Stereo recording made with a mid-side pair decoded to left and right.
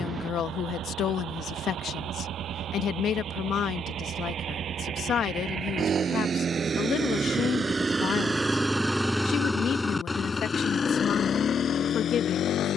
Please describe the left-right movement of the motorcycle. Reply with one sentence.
You can hear the motorcycle move from right to left.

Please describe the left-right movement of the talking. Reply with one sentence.
In this clip you hear the talking stay in one place.